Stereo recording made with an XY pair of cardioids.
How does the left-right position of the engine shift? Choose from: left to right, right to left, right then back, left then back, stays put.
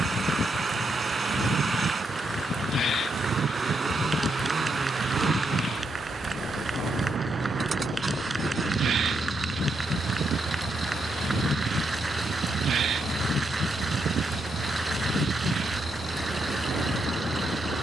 stays put.